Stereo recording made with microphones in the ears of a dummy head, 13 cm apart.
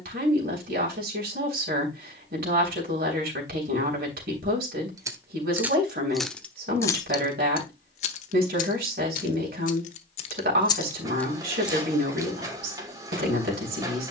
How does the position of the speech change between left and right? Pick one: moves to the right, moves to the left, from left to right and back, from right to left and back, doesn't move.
doesn't move.